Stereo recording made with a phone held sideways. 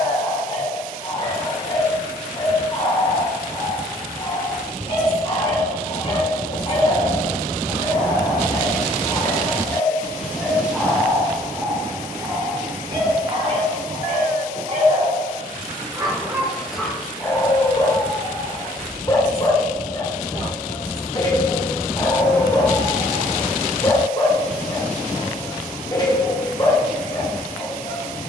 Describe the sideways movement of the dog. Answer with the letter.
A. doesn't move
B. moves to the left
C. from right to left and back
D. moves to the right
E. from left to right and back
E.